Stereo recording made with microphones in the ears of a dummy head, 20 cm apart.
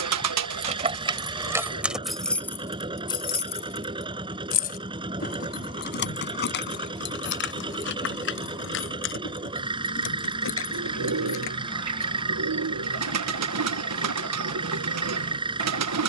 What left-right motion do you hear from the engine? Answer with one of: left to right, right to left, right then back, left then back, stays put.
stays put.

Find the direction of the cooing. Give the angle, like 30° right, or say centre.
80° right.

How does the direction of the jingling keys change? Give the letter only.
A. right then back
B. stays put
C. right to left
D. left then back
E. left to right
C.